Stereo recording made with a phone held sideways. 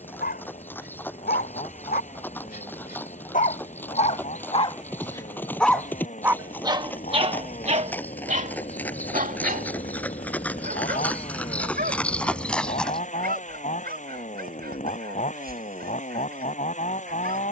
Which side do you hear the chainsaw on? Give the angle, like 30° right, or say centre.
50° left.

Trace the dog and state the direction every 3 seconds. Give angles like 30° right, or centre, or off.
70° left, 40° left, 40° right, 70° right, 80° right, 80° right.